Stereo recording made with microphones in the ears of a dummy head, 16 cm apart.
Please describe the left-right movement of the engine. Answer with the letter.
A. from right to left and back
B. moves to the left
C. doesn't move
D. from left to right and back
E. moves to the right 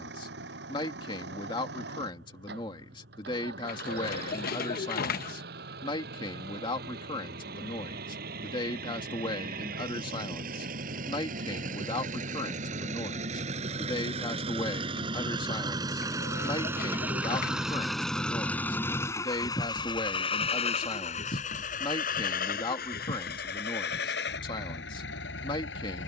B.